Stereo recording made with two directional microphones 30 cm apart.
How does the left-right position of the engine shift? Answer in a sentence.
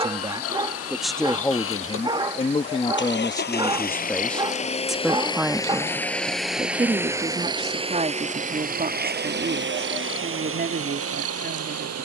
In this clip you hear the engine move to the right.